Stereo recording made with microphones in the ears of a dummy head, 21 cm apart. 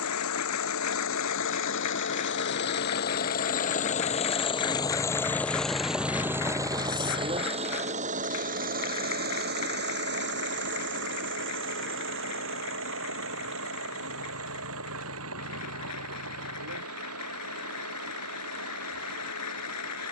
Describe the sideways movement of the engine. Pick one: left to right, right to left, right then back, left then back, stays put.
left to right.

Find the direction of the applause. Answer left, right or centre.
left.